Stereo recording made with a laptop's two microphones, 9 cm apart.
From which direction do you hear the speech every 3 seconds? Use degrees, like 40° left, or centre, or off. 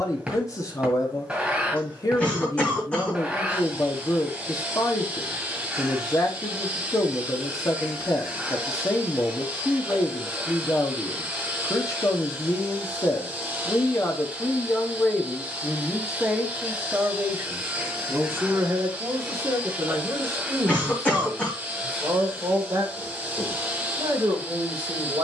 40° left, 40° left, 40° left, 40° left, 30° left, 10° right, 40° right, 50° right, 50° right.